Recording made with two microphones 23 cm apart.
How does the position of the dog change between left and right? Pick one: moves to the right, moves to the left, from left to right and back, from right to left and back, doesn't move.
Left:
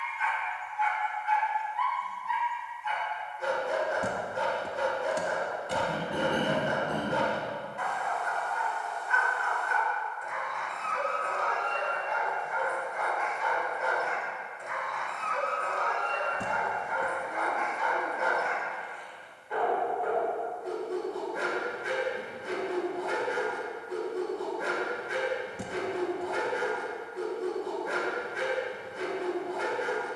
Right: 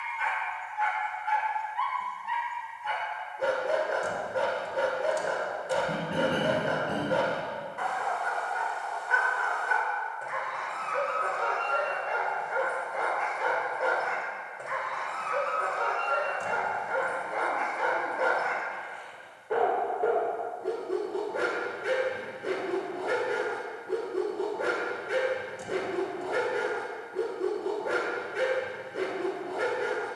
doesn't move.